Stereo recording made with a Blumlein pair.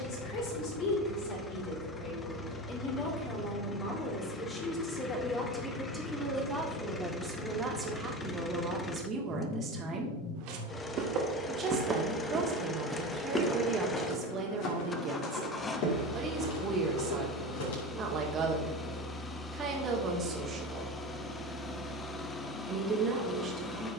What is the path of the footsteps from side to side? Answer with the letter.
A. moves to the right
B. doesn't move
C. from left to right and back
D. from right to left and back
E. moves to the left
E.